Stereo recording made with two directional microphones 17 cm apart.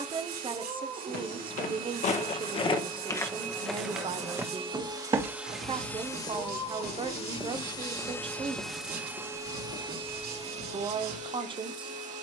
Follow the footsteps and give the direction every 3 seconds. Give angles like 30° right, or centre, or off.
40° left, 10° right, 10° right, 40° left.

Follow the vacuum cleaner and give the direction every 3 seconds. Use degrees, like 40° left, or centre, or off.
50° right, 30° right, 20° left, 30° right.